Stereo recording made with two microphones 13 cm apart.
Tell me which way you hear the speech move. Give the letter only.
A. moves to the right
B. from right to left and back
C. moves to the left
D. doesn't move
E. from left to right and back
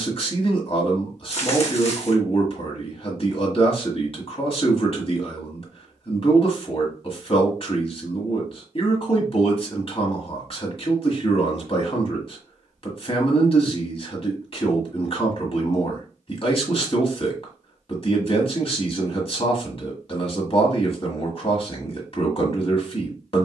D.